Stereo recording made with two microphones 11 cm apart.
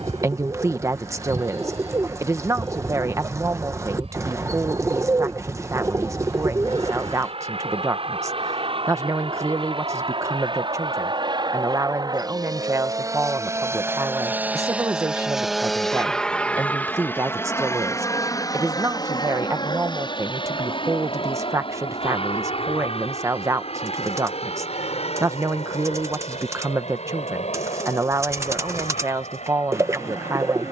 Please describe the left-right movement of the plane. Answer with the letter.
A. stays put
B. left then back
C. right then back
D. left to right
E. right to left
E.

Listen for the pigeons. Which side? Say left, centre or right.
right.